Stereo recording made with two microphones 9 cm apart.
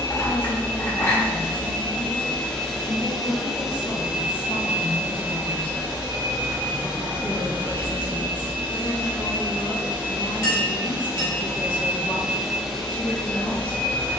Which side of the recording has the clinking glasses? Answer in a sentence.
In this clip you hear the clinking glasses on the left.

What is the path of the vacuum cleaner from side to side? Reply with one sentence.
You can hear the vacuum cleaner go right and come back.